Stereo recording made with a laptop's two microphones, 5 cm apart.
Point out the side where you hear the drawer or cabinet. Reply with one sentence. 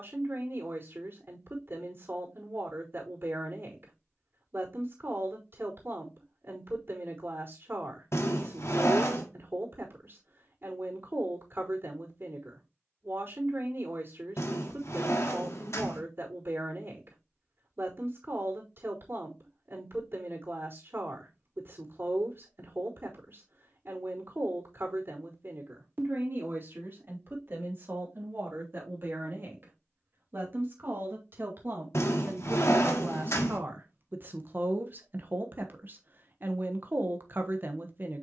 You can hear the drawer or cabinet on the left.